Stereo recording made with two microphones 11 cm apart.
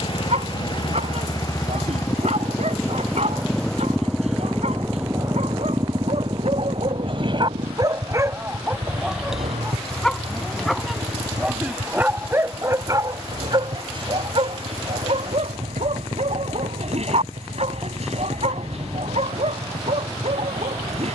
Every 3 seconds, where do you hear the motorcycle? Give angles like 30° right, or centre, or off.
30° left, 10° right, 50° right, 70° right, 80° right, 80° right, 80° right.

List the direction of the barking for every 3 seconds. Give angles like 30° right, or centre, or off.
80° right, 80° right, 40° right, centre, 40° right, 70° right, 80° right.